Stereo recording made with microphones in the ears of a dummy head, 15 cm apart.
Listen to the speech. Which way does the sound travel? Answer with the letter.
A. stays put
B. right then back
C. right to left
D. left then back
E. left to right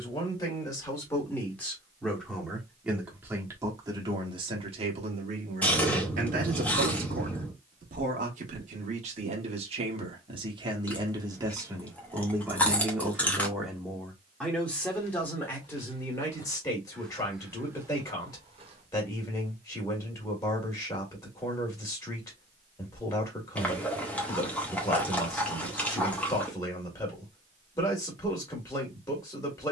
B.